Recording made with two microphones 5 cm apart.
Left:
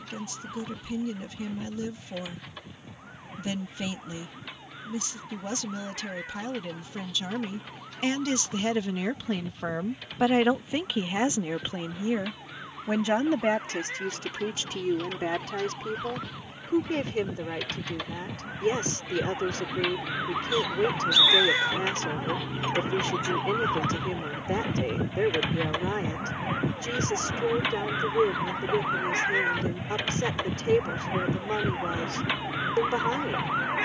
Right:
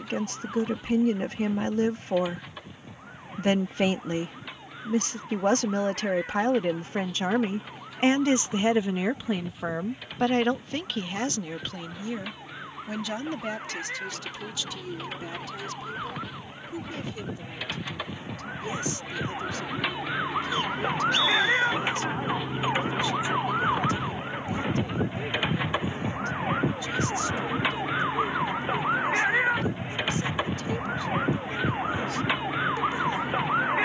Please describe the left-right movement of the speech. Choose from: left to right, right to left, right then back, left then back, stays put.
right to left.